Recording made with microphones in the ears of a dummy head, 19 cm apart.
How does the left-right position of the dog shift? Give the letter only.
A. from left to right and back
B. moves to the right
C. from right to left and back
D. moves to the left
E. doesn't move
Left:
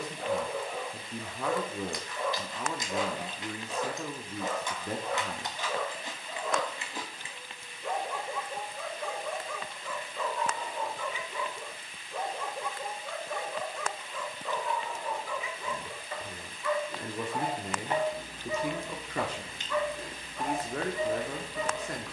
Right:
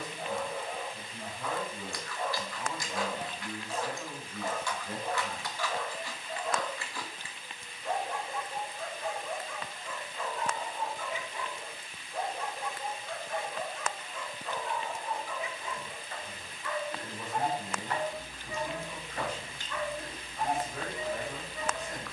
E.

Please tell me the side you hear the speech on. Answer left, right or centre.
left.